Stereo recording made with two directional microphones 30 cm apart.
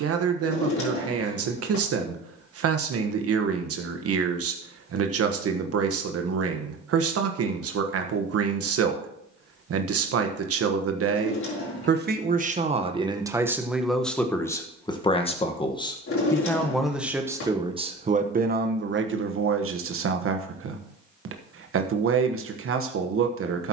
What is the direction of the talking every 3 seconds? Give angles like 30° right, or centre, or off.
50° right, 50° right, 50° right, 50° right, 10° right, centre, 40° right, 50° right.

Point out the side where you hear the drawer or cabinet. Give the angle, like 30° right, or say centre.
50° left.